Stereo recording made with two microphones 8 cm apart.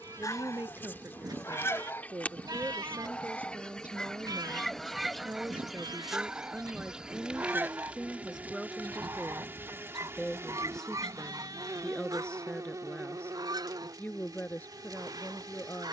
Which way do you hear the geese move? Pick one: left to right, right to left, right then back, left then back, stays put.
left to right.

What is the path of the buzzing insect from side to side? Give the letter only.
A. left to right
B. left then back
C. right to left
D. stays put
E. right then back
A.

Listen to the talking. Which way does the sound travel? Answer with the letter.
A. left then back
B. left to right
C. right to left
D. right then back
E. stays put
C.